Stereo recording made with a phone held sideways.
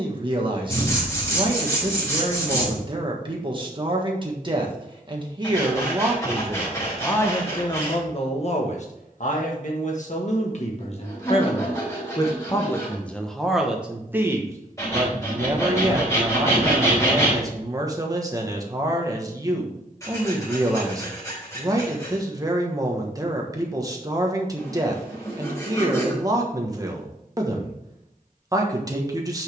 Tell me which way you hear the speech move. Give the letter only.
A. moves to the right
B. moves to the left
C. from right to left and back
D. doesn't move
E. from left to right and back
C.